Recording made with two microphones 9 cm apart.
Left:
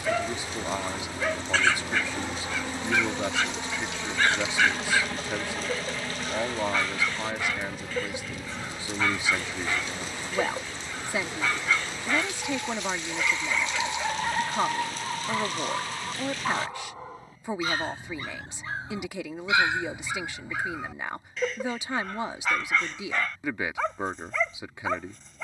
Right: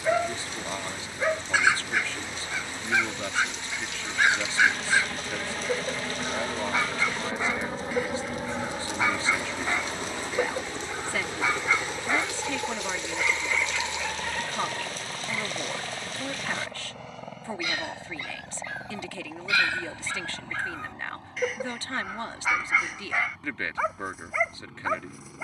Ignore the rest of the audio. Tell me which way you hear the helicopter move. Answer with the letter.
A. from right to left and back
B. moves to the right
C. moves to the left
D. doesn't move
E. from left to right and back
B.